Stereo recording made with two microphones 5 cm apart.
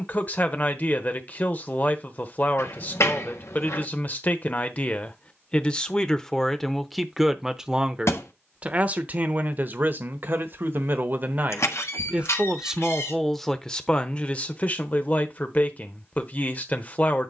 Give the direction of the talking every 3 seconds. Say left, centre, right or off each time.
left, left, centre, right, centre, left.